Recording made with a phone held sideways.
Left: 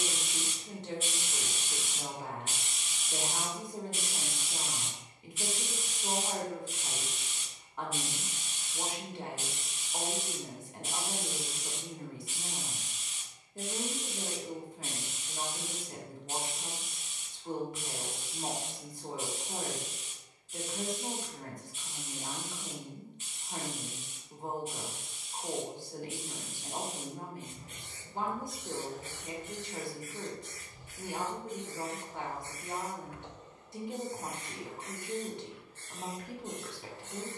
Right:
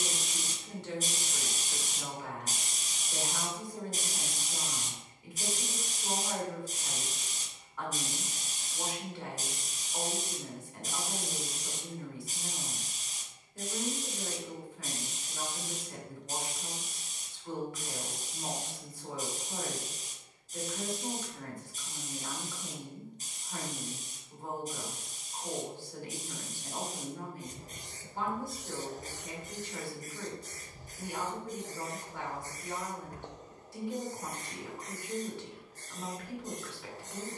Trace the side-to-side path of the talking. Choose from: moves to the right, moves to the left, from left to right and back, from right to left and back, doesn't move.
doesn't move.